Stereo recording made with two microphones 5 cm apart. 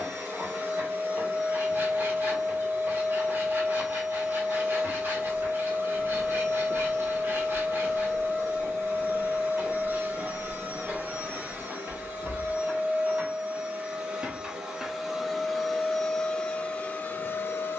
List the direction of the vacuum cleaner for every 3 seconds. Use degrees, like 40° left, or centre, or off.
50° right, 50° right, 50° right, 40° right, 30° right, 20° left.